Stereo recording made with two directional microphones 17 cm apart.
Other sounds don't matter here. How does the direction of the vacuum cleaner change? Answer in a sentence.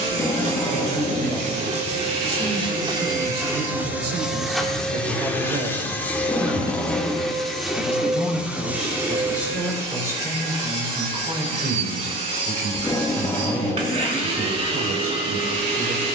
In this clip you hear the vacuum cleaner move from right to left and back again.